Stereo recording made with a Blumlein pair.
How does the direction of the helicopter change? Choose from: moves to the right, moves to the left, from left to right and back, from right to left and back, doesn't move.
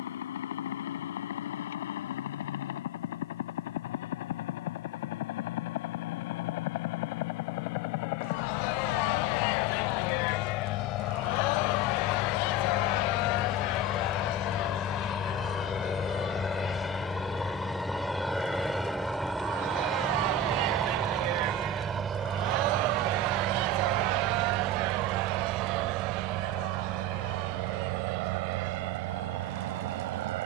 moves to the right.